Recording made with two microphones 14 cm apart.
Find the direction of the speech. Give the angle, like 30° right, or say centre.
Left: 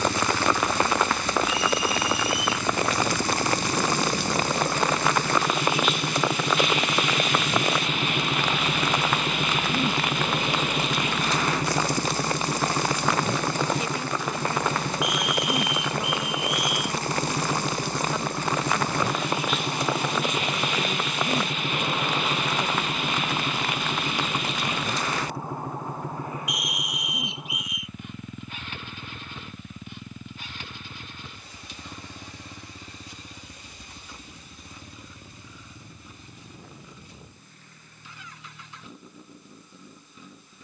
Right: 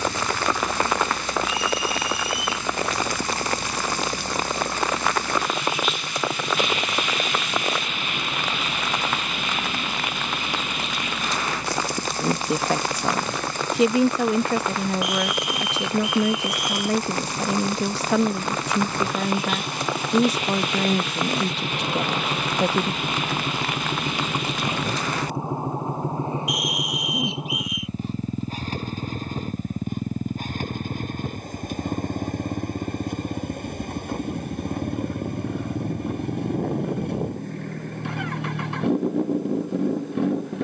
80° right.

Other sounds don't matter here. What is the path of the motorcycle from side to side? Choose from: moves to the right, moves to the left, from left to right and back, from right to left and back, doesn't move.
moves to the right.